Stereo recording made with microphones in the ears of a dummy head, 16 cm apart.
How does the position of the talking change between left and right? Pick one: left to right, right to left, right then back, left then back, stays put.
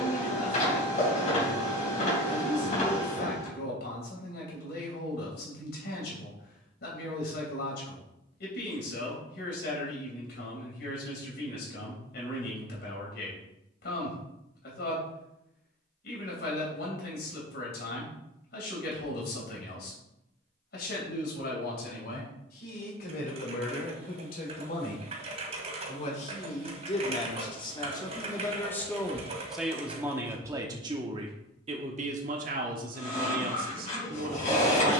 left to right.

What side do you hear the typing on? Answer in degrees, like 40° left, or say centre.
40° right.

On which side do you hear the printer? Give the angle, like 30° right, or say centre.
40° left.